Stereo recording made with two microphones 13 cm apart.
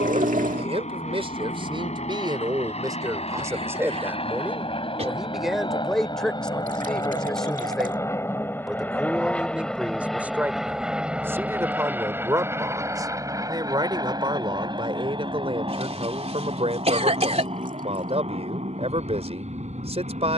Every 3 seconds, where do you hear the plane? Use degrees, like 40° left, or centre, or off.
60° left, 50° left, 20° left, centre, 20° right, 40° right, 50° right.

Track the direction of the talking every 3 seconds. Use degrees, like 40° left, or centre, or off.
40° right, 10° right, centre, 10° right, 30° right, 40° right, 50° right.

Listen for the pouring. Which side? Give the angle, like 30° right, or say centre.
70° right.